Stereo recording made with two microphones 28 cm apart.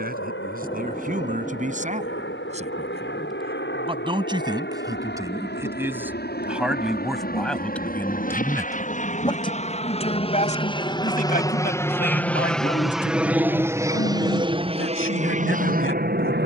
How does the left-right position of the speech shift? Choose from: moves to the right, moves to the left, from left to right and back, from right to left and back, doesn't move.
moves to the left.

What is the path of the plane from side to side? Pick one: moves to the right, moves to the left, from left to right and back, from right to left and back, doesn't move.
moves to the right.